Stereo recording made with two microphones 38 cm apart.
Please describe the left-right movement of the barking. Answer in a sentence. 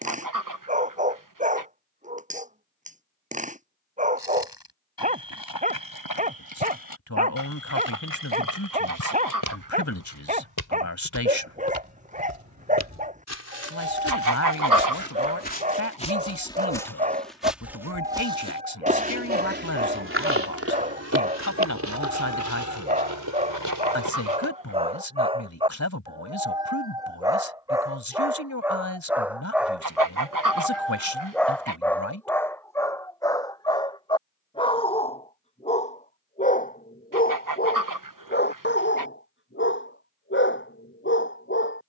You can hear the barking travel towards the left.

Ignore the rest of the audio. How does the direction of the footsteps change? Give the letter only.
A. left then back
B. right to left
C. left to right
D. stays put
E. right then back
C.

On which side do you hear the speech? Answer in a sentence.
In this clip you hear the speech on the left.